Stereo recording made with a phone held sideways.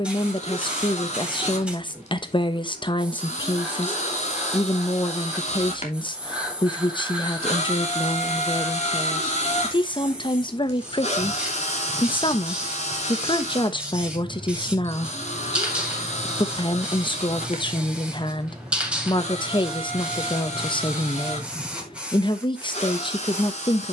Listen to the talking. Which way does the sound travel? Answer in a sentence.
In this clip you hear the talking stay in one place.